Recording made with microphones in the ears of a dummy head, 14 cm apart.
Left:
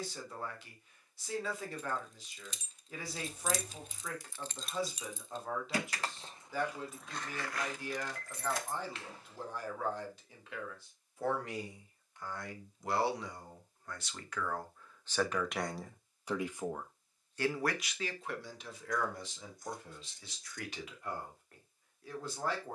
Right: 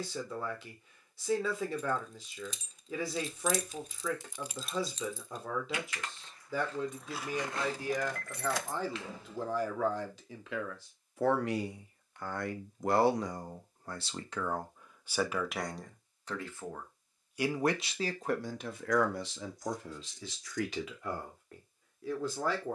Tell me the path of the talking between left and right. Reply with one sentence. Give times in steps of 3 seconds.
You can hear the talking on the right from 0 s, in the centre from 15 s and on the right from 18 s.